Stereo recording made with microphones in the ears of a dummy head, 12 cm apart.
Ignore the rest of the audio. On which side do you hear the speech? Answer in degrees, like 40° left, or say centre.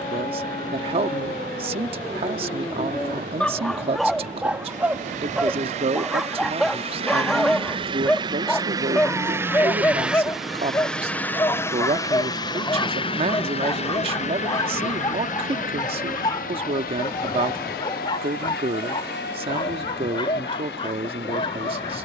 40° right.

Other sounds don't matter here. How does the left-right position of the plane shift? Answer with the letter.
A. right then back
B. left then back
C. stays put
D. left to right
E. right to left
E.